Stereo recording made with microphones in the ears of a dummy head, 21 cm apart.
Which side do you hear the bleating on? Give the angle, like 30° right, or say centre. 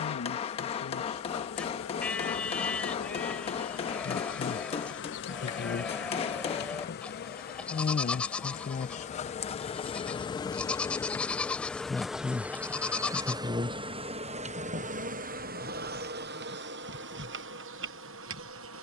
10° left.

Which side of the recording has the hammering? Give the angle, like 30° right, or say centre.
30° left.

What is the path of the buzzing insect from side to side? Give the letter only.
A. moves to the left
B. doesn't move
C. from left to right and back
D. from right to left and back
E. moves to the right
E.